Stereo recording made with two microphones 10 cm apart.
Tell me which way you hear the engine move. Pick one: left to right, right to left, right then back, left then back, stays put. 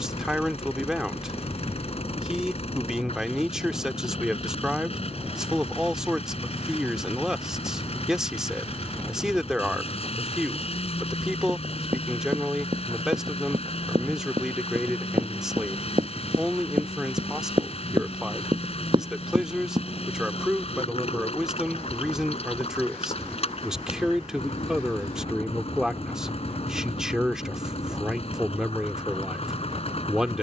stays put.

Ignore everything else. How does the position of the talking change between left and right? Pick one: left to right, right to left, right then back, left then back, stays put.
stays put.